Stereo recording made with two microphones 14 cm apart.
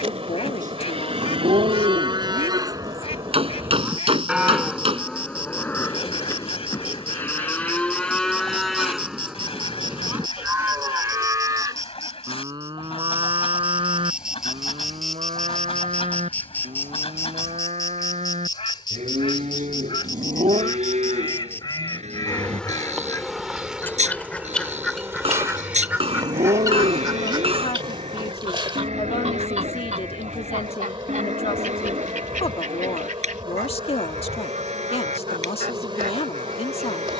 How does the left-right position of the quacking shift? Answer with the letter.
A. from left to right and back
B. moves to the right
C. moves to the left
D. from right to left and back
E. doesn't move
B.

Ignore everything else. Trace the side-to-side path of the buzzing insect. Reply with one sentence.
In this clip you hear the buzzing insect move from right to left and back again.